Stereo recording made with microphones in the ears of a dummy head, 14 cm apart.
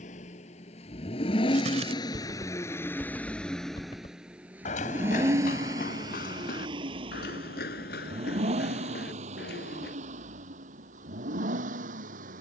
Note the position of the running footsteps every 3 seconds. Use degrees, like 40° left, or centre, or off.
50° right, 50° left, 70° left, 80° left.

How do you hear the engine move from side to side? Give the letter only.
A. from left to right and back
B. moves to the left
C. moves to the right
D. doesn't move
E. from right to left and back
C.